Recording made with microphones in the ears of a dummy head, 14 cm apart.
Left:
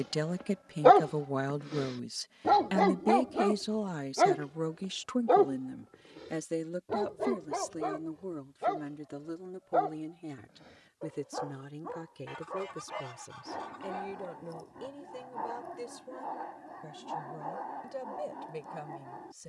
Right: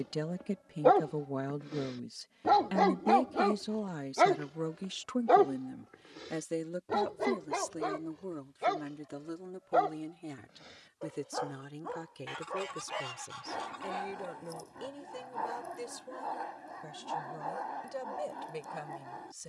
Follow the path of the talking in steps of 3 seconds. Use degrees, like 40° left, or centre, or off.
30° left, 10° left, 10° right, 20° right, 30° right, 30° right, 30° right.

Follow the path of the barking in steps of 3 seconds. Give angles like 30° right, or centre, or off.
centre, 30° right, 50° right, 60° right, 60° right, 60° right, 60° right.